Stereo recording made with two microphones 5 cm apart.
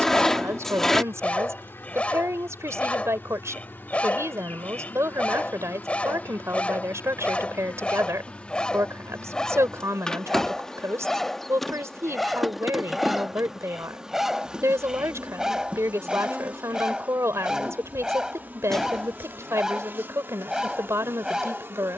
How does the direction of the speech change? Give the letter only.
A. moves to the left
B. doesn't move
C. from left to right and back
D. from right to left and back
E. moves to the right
B.